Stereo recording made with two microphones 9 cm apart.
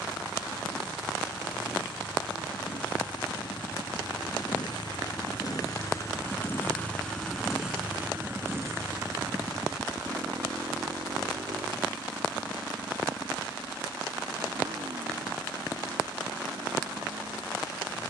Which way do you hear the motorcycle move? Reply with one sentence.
In this clip you hear the motorcycle travel towards the right.